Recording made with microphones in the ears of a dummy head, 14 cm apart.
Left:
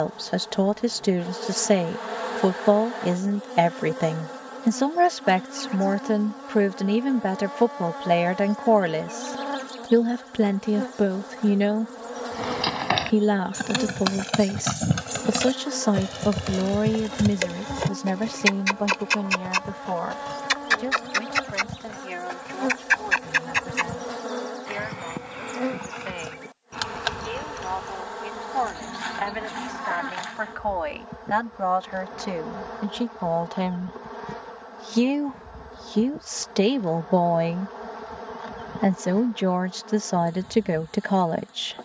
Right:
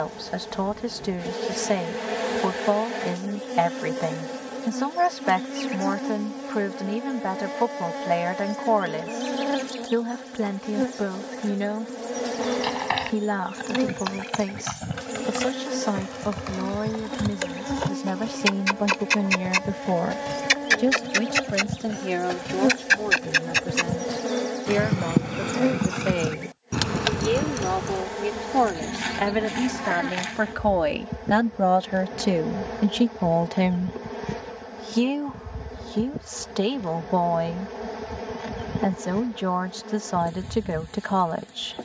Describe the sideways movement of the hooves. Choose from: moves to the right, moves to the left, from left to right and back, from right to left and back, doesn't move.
moves to the right.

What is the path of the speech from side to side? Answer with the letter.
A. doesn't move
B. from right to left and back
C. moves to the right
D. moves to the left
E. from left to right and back
E.